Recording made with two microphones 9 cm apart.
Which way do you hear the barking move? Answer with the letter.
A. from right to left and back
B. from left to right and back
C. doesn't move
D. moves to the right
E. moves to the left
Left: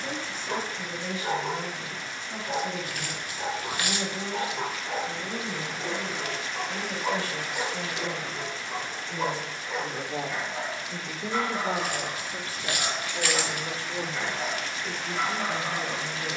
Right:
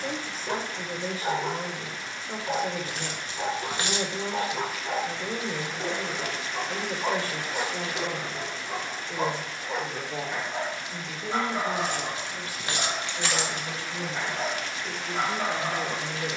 C.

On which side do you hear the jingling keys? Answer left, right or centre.
right.